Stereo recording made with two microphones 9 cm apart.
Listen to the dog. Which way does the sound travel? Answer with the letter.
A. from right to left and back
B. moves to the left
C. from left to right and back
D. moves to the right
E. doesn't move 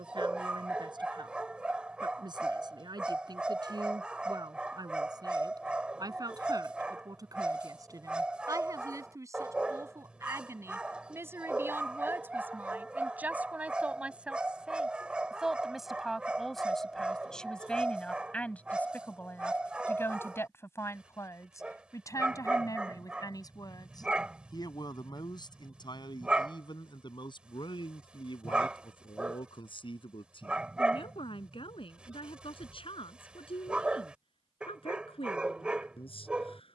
E.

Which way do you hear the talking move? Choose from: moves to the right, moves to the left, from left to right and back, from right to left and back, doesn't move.
moves to the left.